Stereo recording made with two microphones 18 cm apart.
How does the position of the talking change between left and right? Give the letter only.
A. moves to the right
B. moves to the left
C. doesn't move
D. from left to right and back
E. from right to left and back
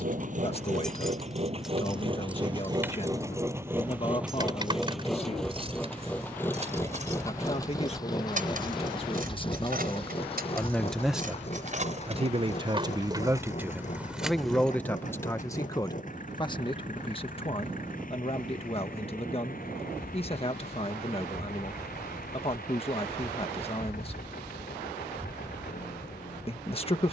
D.